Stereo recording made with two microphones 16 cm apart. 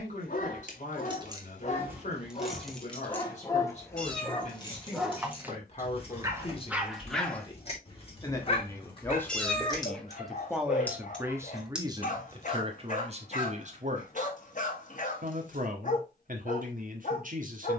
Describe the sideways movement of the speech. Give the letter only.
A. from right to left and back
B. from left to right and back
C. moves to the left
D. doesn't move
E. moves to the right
E.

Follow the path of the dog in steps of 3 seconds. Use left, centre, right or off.
left, centre, centre, left, left, left.